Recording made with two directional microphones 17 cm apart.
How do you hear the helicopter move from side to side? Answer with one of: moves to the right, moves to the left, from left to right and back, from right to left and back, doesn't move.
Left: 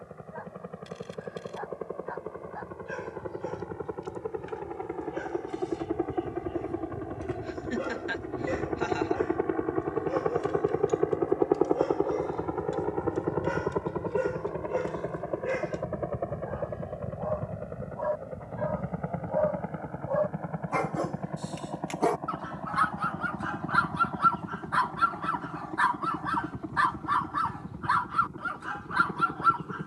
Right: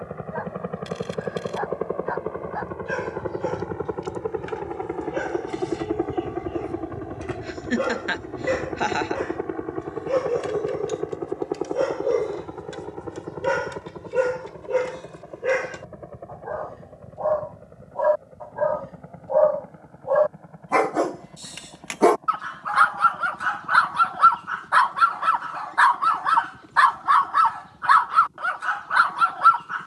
moves to the left.